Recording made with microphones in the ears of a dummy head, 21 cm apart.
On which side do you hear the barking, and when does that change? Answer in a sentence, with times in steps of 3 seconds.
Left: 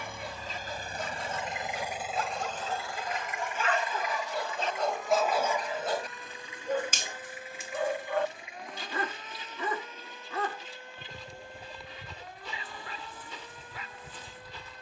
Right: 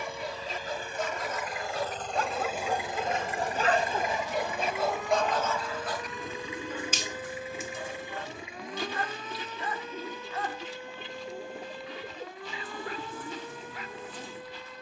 In this clip you hear the barking on the right from 0 s, in the centre from 3 s and on the left from 6 s.